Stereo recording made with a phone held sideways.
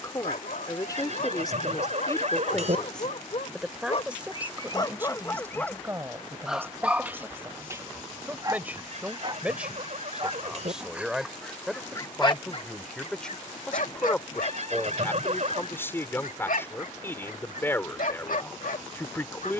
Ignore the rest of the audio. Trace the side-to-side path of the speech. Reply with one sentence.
You can hear the speech go right and come back.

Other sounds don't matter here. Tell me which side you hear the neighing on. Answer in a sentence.
In this clip you hear the neighing on the right.